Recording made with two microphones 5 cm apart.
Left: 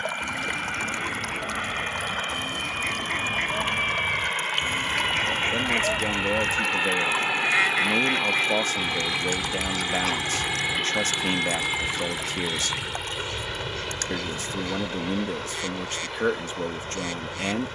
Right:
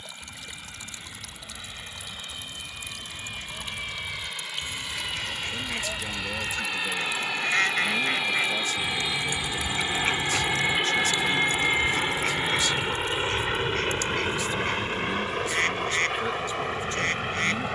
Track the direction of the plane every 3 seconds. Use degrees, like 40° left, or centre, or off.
50° left, 40° left, 20° left, 10° right, 30° right, 50° right.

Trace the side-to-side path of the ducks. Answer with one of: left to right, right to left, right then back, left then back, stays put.
left to right.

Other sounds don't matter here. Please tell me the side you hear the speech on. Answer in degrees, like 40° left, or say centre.
50° left.